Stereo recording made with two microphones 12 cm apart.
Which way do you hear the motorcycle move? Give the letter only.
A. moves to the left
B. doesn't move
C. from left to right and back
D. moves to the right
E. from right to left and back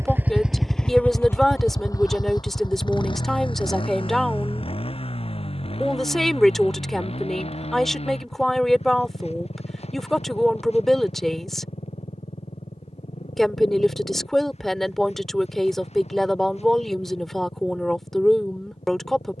A.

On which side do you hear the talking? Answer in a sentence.
In this clip you hear the talking in the centre.